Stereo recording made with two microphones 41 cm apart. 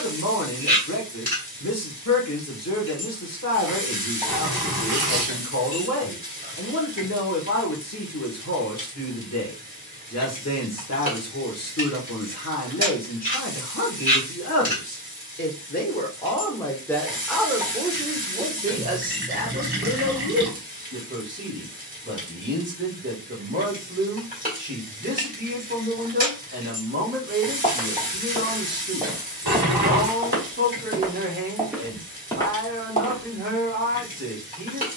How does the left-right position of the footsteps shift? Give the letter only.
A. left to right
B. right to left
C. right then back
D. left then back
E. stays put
C.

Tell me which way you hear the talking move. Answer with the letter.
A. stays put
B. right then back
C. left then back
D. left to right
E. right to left
D.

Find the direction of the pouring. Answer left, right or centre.
right.